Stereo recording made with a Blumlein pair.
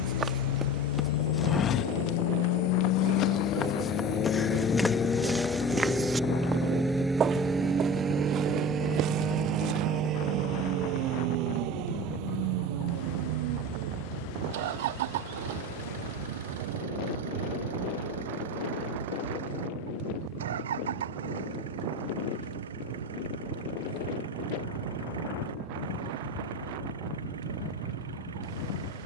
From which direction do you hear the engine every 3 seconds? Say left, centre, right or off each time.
left, left, centre, right, right, right, right, right, right, right.